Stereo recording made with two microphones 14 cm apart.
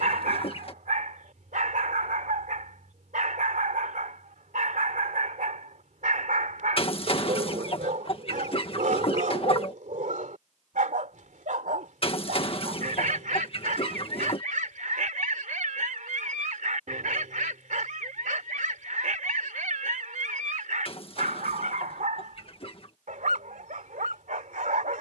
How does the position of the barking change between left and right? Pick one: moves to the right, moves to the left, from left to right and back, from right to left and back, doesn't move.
doesn't move.